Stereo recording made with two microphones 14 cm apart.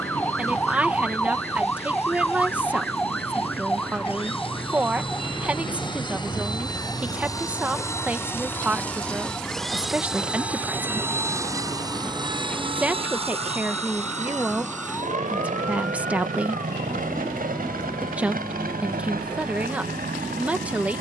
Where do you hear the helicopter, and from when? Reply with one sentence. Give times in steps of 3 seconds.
You can hear the helicopter on the left from 0 s, in the centre from 9 s and on the right from 12 s.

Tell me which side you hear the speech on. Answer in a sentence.
In this clip you hear the speech in the centre.